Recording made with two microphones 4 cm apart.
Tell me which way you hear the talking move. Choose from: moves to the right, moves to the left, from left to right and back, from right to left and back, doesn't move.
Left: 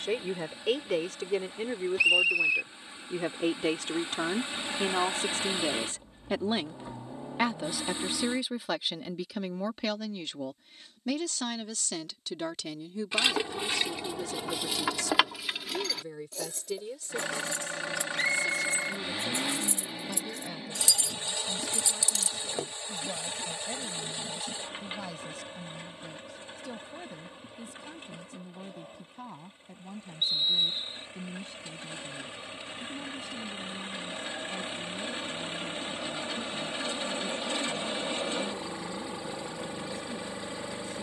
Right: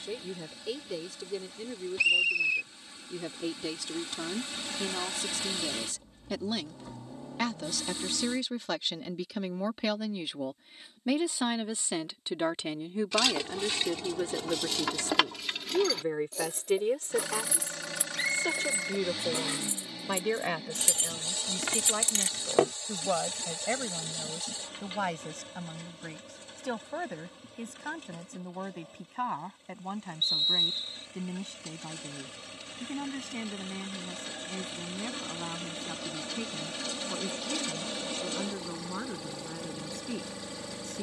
moves to the right.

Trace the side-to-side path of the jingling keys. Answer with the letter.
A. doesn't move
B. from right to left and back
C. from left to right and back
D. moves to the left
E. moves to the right
E.